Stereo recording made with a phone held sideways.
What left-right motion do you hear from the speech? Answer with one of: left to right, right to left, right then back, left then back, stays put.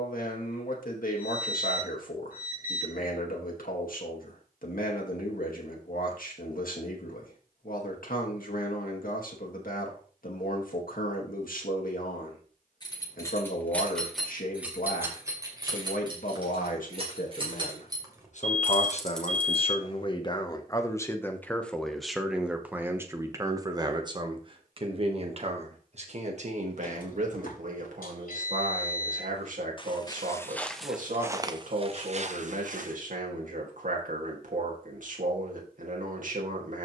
left to right.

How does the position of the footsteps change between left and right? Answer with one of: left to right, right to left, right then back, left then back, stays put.
left to right.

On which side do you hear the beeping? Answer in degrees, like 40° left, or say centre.
60° left.